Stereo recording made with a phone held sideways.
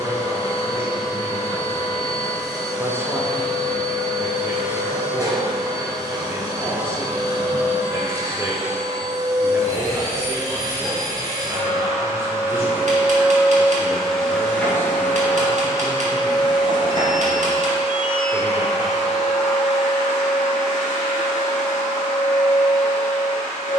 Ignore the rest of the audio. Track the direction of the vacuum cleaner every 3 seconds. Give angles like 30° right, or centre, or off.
30° right, 30° right, 30° right, 30° right, centre, 30° left, 60° left, 60° left.